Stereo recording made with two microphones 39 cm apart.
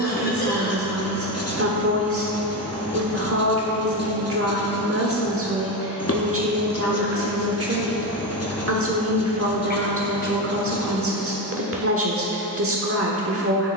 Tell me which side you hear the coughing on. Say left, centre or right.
left.